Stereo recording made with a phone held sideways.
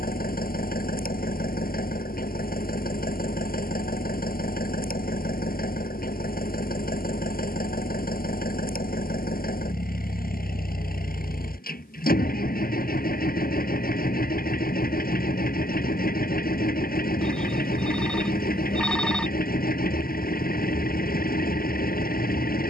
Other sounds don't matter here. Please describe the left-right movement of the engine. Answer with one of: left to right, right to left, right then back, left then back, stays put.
stays put.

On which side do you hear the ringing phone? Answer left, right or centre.
centre.